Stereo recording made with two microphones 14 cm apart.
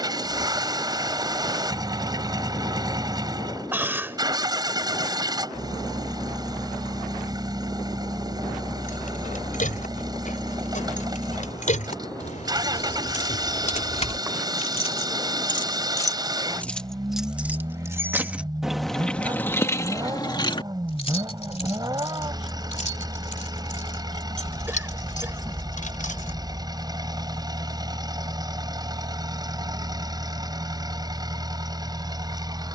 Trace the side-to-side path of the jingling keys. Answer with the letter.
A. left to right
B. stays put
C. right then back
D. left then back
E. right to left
C.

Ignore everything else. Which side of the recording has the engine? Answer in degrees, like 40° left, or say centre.
30° right.